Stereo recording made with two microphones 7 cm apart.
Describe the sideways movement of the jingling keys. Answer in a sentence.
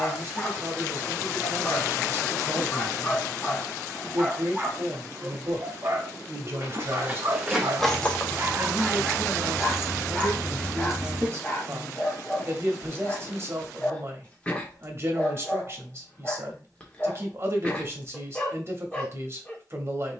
In this clip you hear the jingling keys move from right to left and back again.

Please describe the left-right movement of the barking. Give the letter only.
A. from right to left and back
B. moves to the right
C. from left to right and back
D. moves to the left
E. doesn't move
C.